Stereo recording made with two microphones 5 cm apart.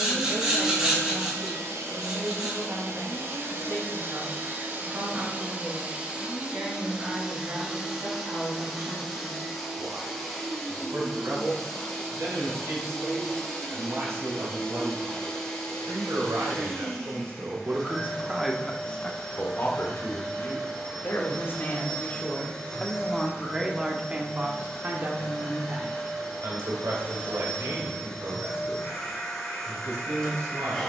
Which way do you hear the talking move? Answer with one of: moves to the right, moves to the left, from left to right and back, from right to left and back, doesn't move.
from right to left and back.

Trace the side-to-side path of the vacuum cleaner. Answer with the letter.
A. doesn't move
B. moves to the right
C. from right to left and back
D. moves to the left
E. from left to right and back
D.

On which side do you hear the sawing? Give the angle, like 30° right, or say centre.
20° right.